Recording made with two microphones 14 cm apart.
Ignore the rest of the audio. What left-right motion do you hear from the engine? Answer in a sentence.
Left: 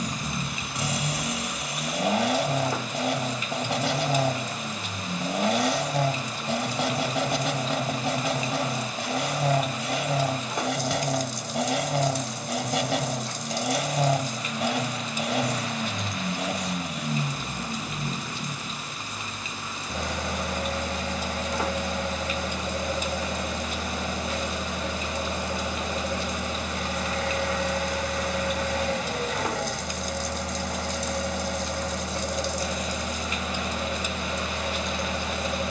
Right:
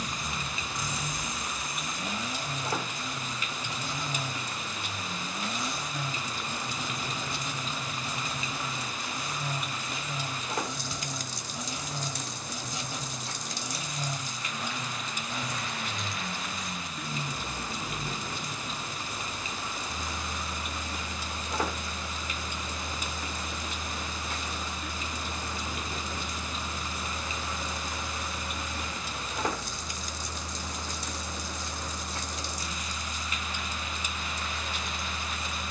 You can hear the engine stay in one place.